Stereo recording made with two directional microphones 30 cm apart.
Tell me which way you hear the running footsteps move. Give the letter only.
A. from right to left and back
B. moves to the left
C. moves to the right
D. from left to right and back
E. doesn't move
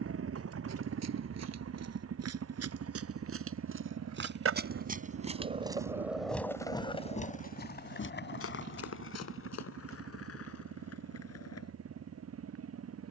B.